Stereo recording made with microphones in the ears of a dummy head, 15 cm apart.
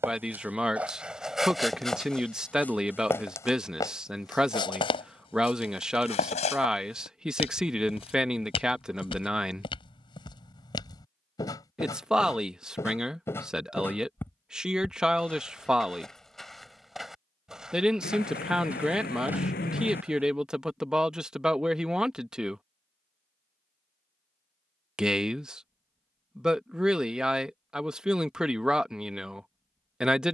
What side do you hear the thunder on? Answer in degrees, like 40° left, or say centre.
60° left.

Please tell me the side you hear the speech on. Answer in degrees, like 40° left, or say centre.
centre.